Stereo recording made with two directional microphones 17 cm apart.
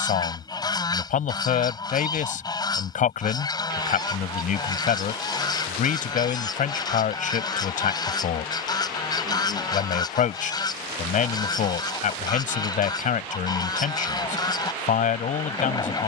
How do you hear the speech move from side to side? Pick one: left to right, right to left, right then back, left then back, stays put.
stays put.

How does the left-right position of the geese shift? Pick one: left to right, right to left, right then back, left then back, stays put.
stays put.